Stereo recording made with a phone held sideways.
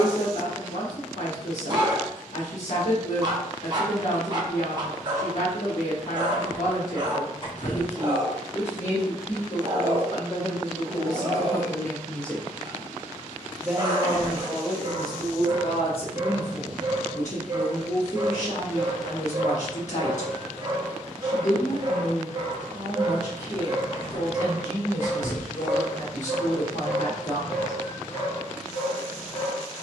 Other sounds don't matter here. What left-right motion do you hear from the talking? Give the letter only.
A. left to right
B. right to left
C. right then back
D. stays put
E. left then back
C.